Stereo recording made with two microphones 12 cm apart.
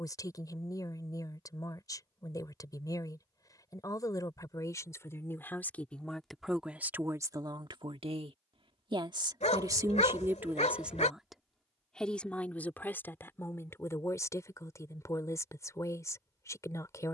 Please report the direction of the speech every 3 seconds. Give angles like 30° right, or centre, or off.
30° left, 30° left, 30° right, 20° right, 20° left, 30° left.